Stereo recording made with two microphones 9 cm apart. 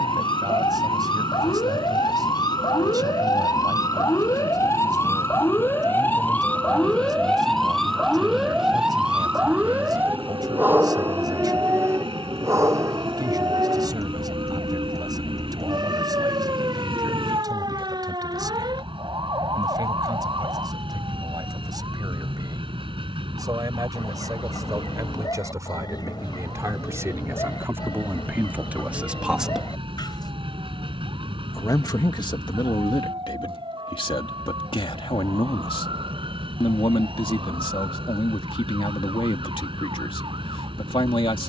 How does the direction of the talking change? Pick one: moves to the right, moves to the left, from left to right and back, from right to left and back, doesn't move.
moves to the left.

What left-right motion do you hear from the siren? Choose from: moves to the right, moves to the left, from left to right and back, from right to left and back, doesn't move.
moves to the right.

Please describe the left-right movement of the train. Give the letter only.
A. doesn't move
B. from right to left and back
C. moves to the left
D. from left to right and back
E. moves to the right
A.